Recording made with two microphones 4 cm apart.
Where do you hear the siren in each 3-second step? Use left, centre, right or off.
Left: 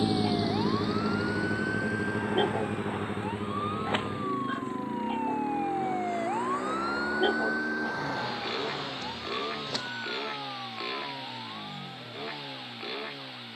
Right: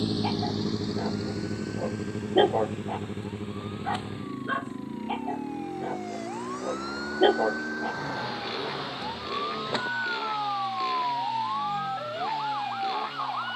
left, left, centre, right, right.